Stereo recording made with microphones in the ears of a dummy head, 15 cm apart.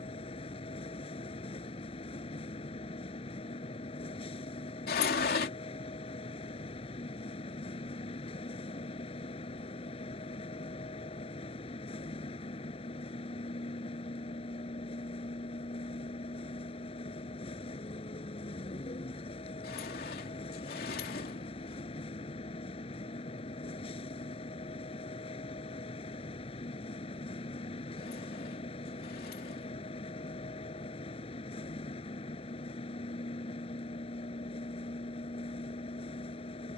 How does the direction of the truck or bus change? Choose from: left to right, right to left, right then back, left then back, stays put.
stays put.